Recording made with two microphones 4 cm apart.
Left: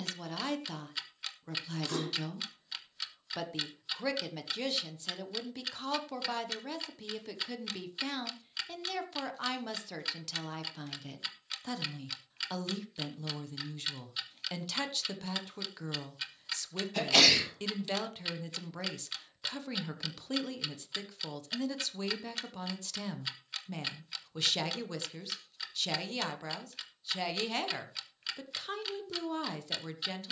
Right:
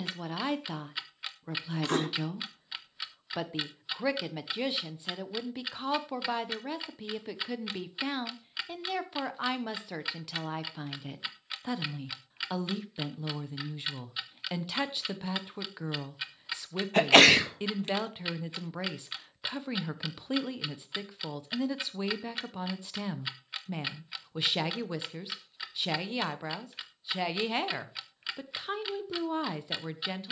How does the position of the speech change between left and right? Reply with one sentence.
You can hear the speech stay in one place.